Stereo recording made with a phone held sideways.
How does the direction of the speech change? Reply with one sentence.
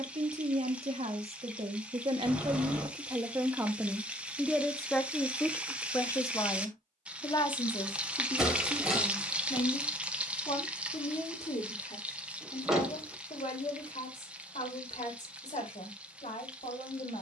You can hear the speech move from right to left.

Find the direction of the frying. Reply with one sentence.
In this clip you hear the frying in the centre.